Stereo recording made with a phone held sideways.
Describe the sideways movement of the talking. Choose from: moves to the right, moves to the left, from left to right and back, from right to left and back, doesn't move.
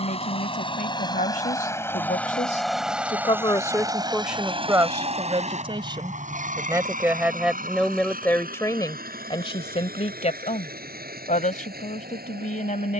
from left to right and back.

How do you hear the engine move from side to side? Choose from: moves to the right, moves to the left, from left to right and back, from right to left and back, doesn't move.
moves to the right.